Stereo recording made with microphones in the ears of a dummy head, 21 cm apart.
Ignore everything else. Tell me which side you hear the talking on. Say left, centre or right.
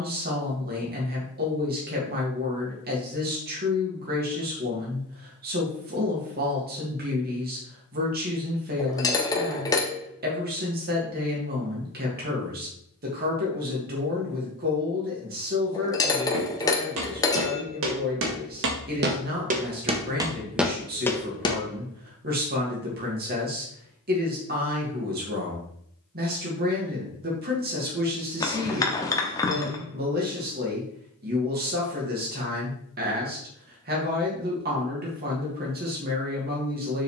right.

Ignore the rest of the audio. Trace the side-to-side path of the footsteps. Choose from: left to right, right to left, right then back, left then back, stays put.
right to left.